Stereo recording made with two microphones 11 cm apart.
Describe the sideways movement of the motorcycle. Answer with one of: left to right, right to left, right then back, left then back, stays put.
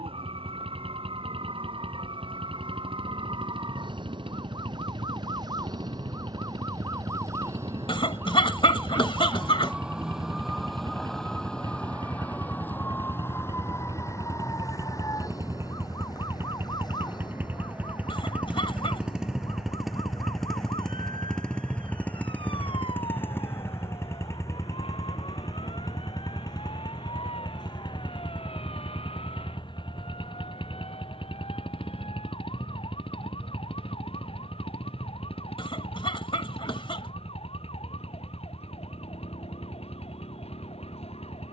right to left.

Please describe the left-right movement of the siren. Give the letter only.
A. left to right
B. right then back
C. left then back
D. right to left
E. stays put
D.